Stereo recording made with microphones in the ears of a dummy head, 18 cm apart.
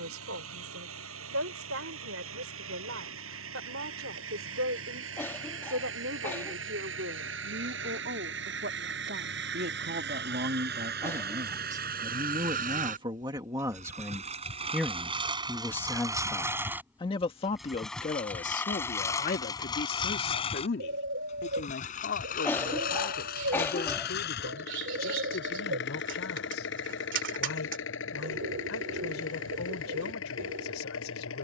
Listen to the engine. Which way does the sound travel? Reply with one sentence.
In this clip you hear the engine move from right to left.